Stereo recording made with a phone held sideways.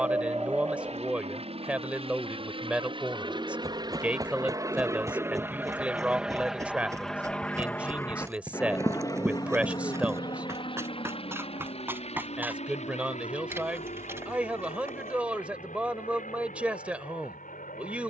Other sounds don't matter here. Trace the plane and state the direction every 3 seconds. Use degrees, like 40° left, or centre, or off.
50° right, 30° right, 10° left, 40° left, 50° left, 60° left.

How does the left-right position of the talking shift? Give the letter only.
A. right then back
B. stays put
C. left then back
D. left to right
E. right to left
B.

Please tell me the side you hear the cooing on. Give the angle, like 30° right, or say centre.
20° right.